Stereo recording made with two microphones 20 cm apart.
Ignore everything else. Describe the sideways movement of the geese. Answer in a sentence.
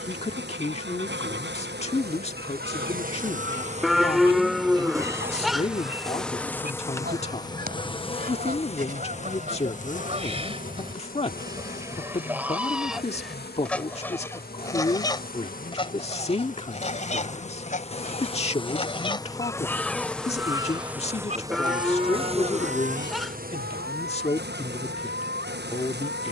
In this clip you hear the geese move from right to left and back again.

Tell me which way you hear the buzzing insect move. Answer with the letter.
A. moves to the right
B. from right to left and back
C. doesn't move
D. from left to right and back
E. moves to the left
B.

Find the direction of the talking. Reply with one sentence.
In this clip you hear the talking on the left.